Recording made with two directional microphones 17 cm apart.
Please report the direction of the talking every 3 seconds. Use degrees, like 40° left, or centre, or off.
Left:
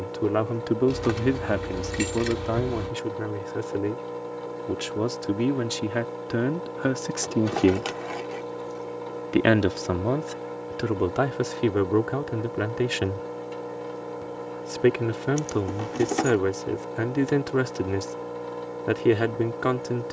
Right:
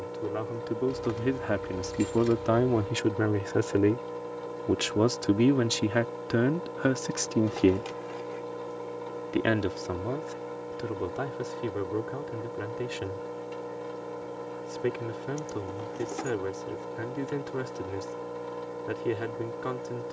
20° left, 20° right, 10° left, 50° left, 60° left, 60° left, 60° left.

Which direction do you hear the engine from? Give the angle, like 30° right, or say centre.
20° left.